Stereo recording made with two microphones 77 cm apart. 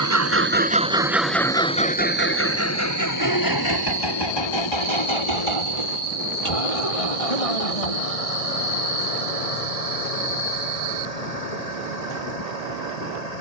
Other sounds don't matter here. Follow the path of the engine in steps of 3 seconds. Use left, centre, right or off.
centre, left, left, left, left.